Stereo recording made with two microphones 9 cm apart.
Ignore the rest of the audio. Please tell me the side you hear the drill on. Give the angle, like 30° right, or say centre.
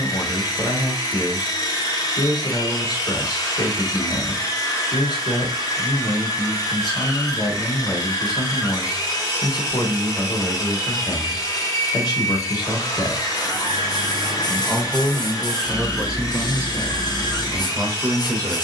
40° left.